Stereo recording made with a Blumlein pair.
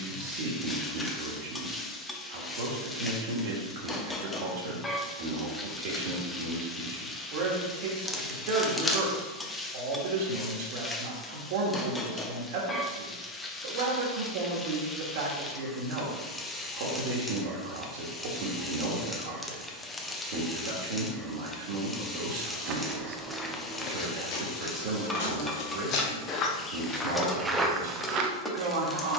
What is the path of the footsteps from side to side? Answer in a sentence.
In this clip you hear the footsteps go left and come back.